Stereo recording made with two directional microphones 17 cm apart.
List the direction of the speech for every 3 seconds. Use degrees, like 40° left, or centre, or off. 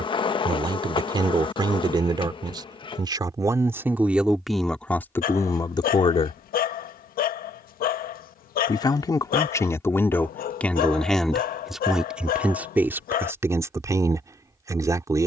30° right, centre, 30° left, 10° left, 10° right.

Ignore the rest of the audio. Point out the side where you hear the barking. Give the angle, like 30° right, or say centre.
60° left.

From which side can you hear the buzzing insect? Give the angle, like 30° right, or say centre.
30° left.